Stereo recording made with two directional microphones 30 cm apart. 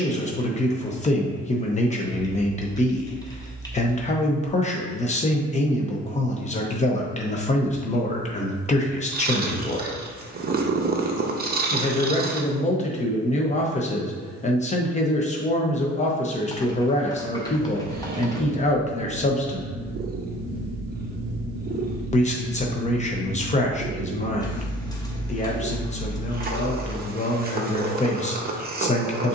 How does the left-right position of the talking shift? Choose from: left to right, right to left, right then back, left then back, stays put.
stays put.